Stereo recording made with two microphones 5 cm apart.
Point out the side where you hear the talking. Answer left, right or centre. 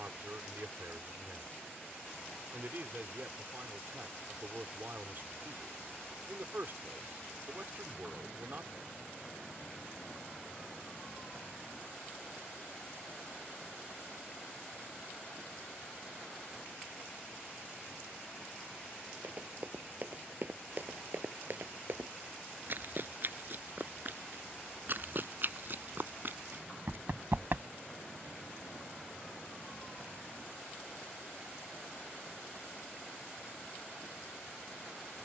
right.